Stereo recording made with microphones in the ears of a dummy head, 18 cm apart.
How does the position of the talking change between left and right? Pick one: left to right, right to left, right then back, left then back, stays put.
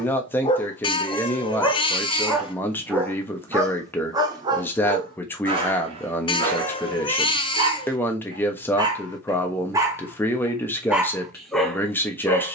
stays put.